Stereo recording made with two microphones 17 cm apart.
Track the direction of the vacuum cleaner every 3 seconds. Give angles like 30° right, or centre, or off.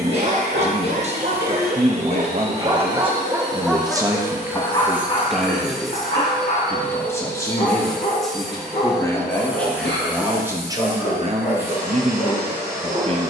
20° right, 10° right, centre, 10° right, 20° right.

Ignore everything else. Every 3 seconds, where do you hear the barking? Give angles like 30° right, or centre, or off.
50° right, 10° left, 60° left, 70° left, 70° left.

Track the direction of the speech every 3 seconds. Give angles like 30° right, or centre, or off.
40° right, 10° right, 20° left, 10° right, 40° right.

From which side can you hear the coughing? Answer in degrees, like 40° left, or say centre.
90° left.